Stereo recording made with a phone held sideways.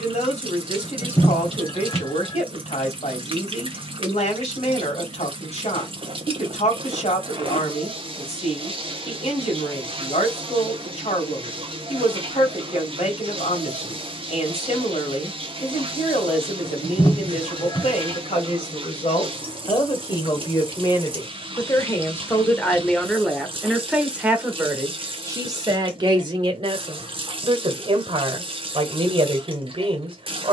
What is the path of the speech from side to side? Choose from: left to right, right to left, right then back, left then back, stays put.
left to right.